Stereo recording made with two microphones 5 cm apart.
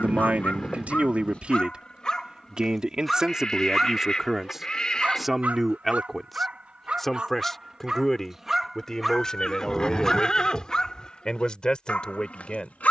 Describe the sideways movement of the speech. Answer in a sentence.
In this clip you hear the speech travel towards the left.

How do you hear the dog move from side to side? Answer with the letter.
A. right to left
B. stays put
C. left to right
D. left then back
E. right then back
E.